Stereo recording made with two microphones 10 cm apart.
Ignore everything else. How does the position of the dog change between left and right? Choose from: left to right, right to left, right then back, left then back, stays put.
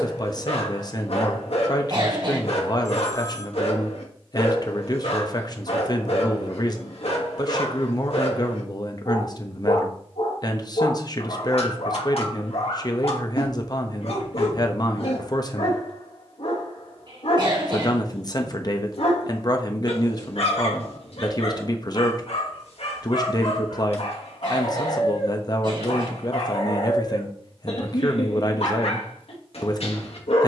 stays put.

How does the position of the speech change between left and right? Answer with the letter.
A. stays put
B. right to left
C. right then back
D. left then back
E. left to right
A.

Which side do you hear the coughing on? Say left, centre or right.
right.